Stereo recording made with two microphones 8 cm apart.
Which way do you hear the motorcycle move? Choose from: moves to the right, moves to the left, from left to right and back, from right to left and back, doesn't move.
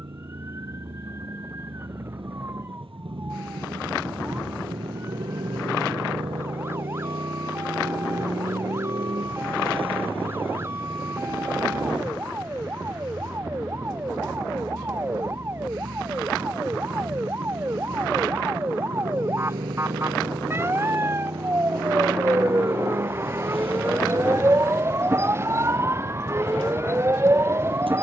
doesn't move.